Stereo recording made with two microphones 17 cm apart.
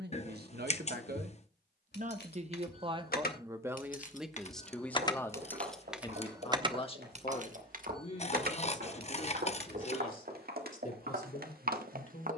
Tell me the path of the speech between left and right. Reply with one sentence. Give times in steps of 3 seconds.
You can hear the speech on the right from 0 s, in the centre from 3 s and on the left from 6 s.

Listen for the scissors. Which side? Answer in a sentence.
You can hear the scissors on the left.